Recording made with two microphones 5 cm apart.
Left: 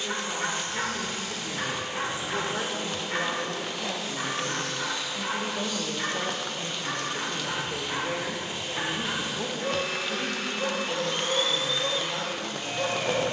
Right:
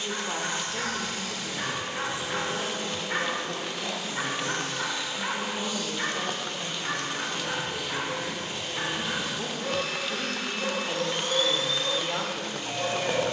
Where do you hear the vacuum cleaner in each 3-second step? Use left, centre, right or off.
left, centre, centre, left, left.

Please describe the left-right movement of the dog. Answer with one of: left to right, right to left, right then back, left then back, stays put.
right then back.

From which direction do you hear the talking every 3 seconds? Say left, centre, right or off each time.
centre, left, left, centre, right.